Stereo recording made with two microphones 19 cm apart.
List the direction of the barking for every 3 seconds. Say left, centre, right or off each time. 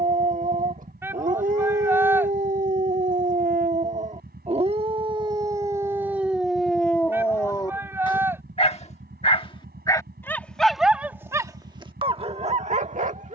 right, right, centre, centre, right.